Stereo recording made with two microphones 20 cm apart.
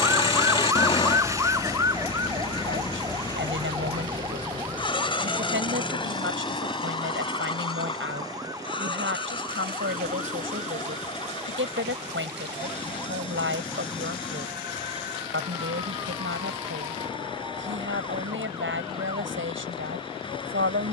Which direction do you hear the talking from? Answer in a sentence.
You can hear the talking on the right.